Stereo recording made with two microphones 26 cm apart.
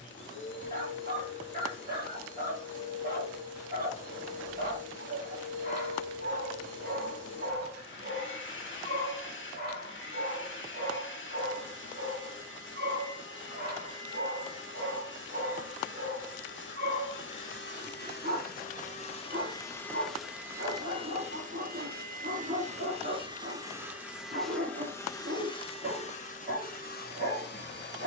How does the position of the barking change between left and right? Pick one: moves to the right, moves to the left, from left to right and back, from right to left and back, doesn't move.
doesn't move.